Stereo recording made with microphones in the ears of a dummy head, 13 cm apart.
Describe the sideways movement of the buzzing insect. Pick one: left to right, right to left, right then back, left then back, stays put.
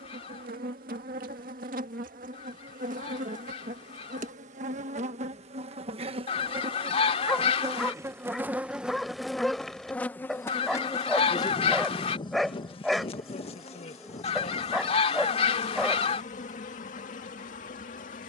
right to left.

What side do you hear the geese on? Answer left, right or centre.
left.